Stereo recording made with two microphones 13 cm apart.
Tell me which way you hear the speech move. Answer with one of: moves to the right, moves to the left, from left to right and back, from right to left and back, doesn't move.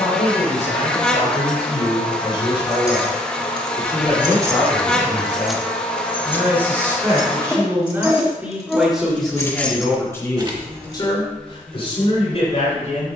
from left to right and back.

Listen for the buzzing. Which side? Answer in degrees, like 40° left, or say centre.
10° left.